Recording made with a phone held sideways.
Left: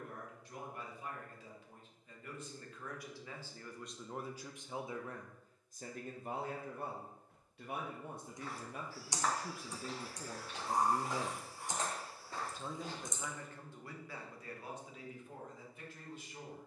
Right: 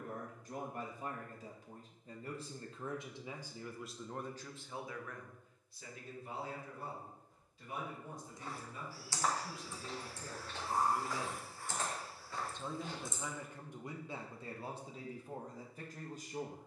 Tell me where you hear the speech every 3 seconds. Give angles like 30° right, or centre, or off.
40° right, 10° left, 60° left, 50° left, 20° right, 40° right.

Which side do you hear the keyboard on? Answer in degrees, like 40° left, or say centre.
20° left.